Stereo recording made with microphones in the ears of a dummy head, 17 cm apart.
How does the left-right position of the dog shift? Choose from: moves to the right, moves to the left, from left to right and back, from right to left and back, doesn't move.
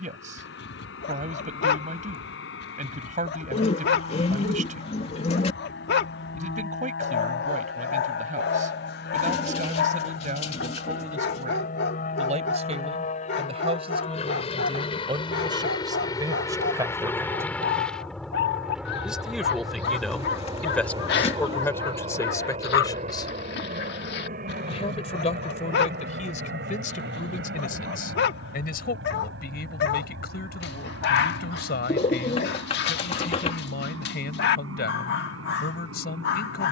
doesn't move.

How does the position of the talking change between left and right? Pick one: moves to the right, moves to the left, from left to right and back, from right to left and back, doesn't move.
moves to the left.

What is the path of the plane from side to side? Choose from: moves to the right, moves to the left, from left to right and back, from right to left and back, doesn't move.
moves to the right.